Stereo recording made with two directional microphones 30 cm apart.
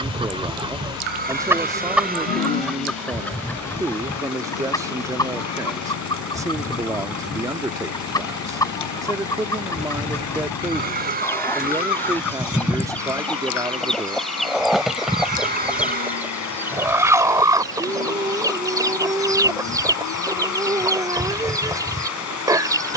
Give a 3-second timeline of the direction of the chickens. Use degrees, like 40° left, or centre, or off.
10° right, 10° left, 10° left, 10° left, centre, 10° right, 10° right, 10° right.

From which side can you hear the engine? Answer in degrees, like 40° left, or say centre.
70° left.